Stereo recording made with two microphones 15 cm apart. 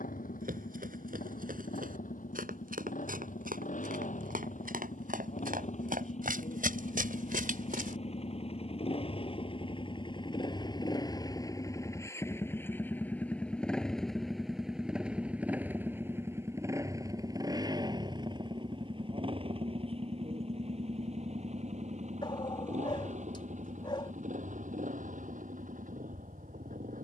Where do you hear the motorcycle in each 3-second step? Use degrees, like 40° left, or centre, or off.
60° left, 60° left, 50° left, 30° left, 10° left, 20° right, 40° right, 50° right, 60° right.